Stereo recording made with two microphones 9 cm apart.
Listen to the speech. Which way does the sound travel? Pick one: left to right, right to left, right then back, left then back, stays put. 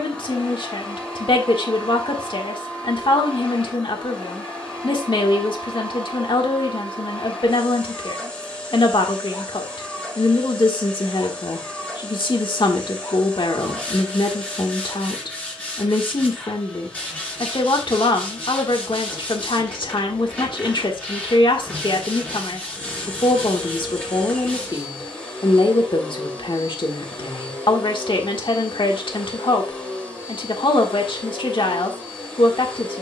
stays put.